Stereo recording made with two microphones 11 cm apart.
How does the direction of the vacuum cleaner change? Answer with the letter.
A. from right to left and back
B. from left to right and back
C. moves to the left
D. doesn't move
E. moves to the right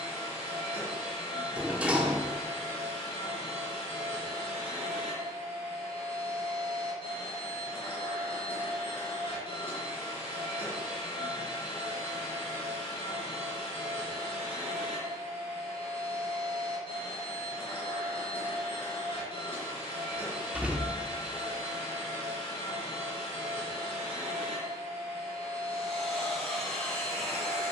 D.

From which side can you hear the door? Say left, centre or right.
centre.